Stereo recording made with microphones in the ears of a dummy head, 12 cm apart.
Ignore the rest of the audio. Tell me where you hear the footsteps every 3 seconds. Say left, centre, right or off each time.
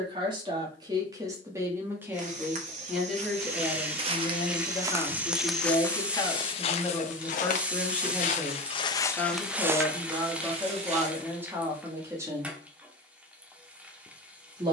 right, right, left, right, off.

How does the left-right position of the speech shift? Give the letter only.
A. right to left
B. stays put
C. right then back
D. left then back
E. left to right
D.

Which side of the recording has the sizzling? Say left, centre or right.
centre.